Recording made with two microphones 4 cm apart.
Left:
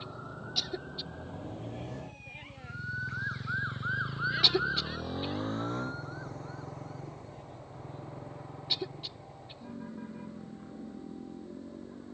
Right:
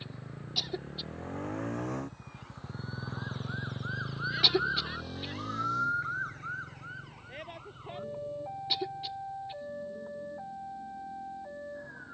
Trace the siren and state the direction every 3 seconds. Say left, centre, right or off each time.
left, centre, right, right.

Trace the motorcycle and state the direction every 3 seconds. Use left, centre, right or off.
right, centre, left, left.